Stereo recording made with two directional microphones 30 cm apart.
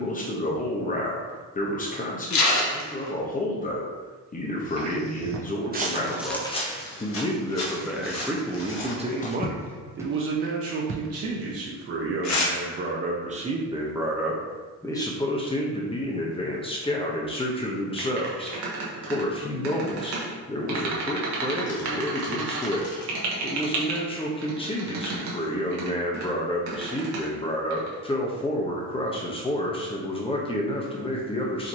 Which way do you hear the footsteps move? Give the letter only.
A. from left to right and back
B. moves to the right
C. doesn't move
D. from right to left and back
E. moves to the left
D.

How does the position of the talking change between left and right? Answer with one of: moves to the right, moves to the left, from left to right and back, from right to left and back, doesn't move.
from left to right and back.